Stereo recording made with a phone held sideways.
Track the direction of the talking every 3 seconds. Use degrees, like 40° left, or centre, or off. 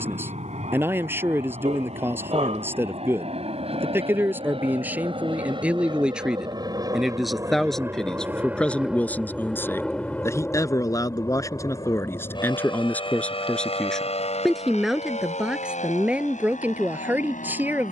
20° right, 10° right, centre, 20° left, 10° left, 10° right.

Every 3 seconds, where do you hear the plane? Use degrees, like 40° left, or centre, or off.
60° right, 50° right, 20° right, 10° left, 40° left, 60° left.